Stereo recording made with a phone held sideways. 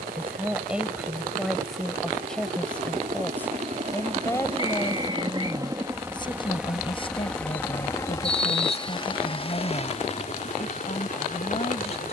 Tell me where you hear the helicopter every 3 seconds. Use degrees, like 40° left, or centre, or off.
60° right, 40° right, 10° left, 40° left.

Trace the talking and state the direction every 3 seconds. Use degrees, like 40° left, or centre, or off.
centre, 20° left, 40° left, 40° left.